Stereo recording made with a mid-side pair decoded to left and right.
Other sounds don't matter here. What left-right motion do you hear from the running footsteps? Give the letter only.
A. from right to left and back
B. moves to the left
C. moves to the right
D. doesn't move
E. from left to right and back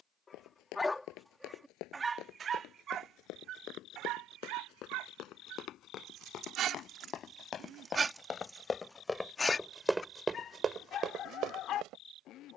C.